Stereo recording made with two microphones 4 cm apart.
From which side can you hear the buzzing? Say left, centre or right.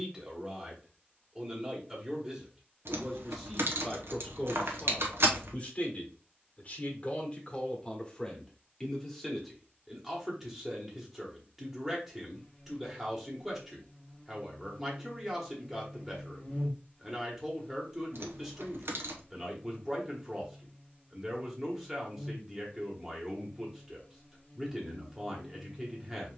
left.